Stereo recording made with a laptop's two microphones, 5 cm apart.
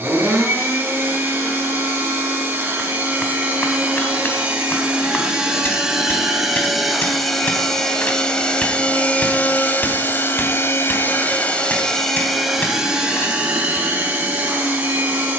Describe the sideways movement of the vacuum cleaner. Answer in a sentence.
You can hear the vacuum cleaner go left and come back.